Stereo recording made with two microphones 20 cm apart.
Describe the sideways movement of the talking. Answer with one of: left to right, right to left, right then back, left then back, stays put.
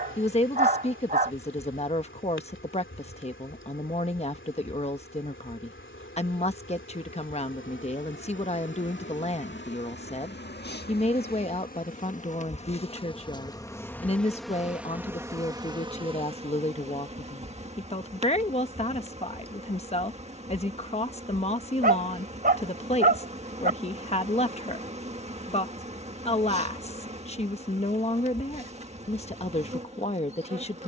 stays put.